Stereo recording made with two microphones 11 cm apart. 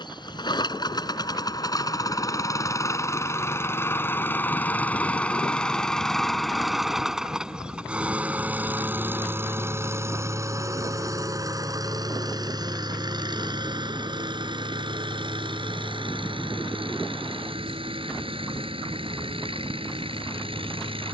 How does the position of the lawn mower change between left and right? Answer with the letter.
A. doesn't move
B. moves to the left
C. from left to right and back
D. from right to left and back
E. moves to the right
E.